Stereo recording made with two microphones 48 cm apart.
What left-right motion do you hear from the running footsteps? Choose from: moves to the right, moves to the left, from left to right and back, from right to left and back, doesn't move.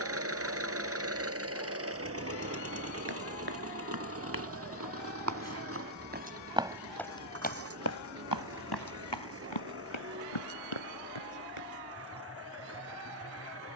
moves to the left.